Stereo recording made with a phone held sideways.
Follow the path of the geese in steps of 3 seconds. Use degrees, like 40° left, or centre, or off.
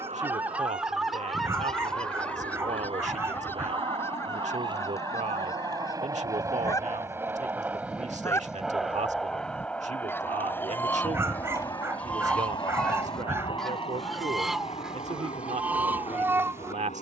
centre, 20° left, 20° left, 20° left, centre, 10° right.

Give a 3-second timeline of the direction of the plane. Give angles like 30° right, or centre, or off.
50° right, 40° right, 10° right, 20° left, 40° left, 50° left.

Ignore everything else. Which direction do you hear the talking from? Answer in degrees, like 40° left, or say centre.
60° right.